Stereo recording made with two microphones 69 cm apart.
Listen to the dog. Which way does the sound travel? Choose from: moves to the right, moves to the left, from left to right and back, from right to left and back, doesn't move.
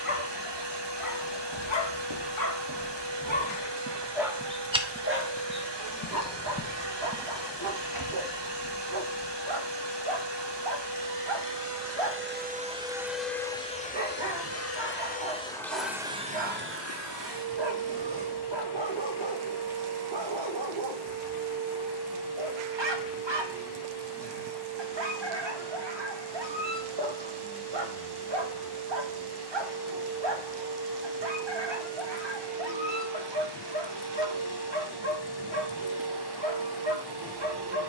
moves to the right.